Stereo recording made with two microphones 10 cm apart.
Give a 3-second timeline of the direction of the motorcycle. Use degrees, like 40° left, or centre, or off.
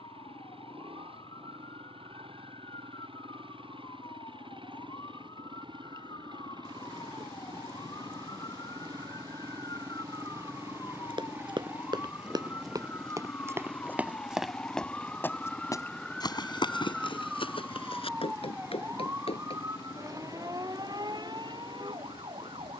70° right, 60° right, 50° right, 30° right, centre, 20° left, 40° left, 50° left.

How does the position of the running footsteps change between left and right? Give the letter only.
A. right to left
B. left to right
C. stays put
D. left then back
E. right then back
A.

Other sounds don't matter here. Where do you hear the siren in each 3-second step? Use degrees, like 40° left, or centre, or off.
50° left, 50° left, 50° left, 40° left, 20° left, centre, 30° right, 50° right.